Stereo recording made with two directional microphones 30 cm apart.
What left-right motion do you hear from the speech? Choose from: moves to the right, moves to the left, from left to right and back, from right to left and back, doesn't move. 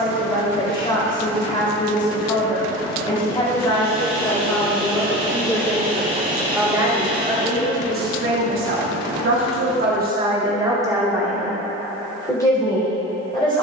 from left to right and back.